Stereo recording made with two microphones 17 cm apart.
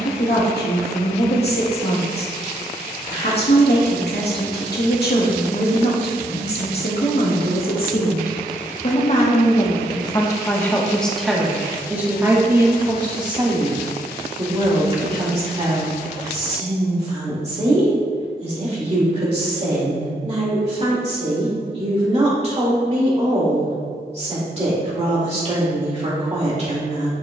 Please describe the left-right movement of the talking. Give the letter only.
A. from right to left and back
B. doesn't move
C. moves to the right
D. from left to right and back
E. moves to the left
C.